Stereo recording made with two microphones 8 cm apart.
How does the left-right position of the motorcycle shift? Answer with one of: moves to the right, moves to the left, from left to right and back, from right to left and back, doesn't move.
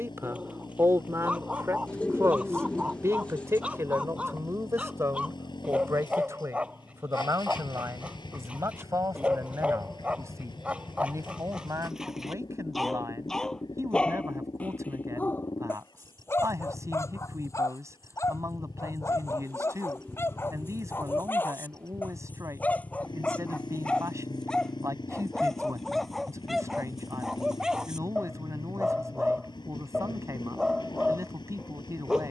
doesn't move.